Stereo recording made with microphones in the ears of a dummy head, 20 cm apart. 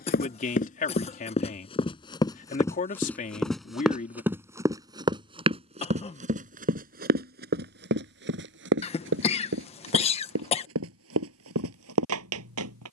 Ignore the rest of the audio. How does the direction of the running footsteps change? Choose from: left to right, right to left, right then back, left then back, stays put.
left to right.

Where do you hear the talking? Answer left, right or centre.
left.